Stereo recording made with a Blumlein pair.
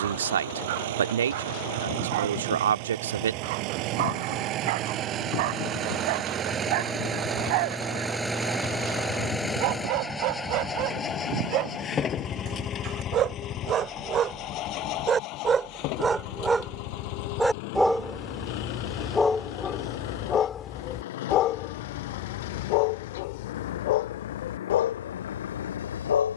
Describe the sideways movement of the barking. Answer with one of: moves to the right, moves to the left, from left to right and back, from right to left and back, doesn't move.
moves to the left.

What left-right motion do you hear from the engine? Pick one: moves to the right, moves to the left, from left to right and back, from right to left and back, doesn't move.
moves to the left.